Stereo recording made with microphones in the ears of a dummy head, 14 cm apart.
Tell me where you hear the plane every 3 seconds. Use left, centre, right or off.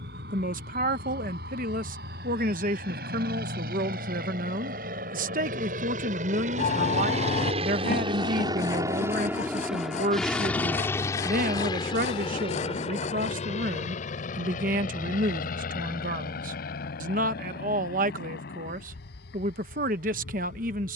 right, right, right, centre, left, left, left.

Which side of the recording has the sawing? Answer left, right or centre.
left.